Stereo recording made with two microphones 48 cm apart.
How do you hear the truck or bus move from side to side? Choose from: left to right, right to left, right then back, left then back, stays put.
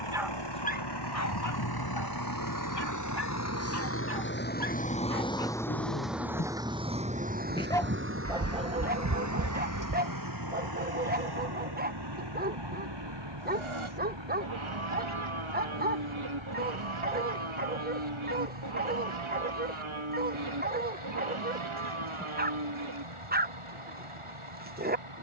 left to right.